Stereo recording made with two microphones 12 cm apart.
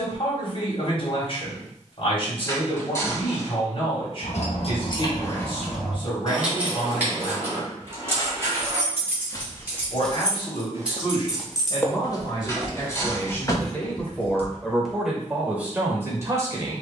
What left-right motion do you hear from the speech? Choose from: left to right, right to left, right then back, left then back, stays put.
left to right.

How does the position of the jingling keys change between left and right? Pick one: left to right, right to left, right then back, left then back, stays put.
right then back.